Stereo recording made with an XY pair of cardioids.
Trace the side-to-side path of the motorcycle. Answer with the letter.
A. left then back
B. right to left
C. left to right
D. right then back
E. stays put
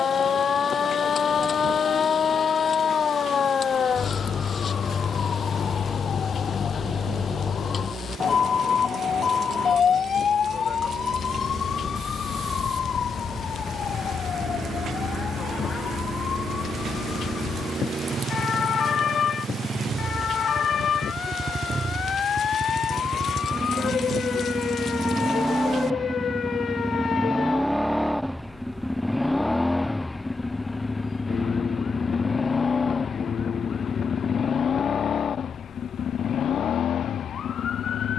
B.